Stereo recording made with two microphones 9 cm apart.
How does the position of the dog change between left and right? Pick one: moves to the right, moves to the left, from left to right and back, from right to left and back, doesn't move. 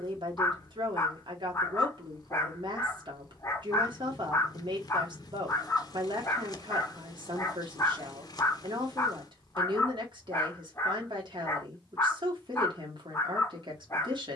doesn't move.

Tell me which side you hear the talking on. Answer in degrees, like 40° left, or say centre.
60° right.